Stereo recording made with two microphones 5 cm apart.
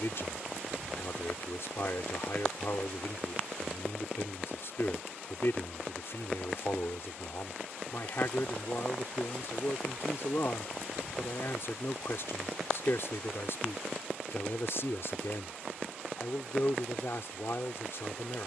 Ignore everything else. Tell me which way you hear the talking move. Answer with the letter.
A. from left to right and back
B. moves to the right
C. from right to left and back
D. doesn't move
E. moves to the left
D.